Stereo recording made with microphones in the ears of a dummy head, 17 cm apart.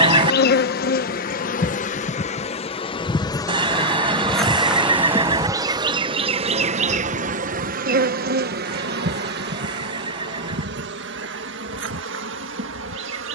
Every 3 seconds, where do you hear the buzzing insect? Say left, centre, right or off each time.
left, centre, right, right, right.